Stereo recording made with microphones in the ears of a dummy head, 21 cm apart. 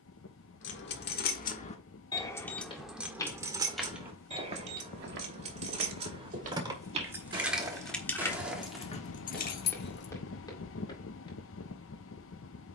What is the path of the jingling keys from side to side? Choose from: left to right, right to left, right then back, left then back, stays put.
right then back.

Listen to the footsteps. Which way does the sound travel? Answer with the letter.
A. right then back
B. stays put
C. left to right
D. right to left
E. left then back
A.